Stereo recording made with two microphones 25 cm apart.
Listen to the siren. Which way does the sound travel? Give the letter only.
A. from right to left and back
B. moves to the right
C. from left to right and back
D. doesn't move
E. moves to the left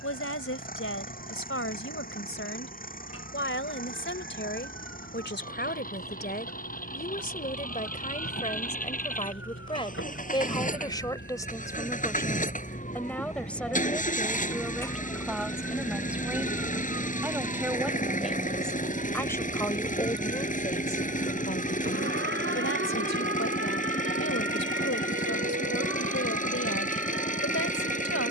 B.